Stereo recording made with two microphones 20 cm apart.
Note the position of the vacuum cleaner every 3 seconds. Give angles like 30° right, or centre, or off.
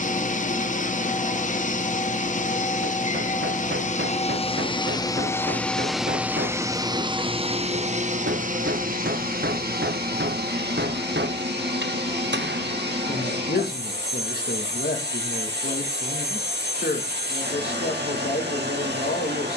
40° left, 30° left, 30° right, 60° right, 60° right, 60° right, 60° right.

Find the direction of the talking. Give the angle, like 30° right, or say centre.
60° left.